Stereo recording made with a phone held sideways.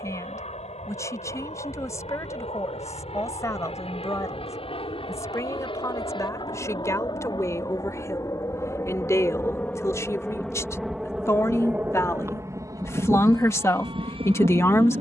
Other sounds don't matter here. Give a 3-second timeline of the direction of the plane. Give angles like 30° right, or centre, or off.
50° left, 40° left, 30° left, centre, 30° right.